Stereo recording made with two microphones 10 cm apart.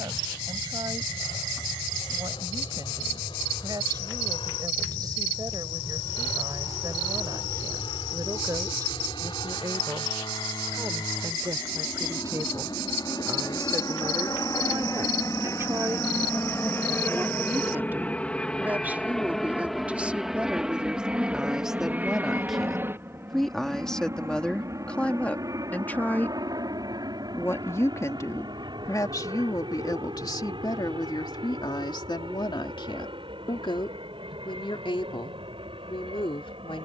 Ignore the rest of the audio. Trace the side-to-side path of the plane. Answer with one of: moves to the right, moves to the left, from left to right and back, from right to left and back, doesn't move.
moves to the right.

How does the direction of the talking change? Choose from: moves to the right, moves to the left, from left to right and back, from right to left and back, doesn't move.
moves to the left.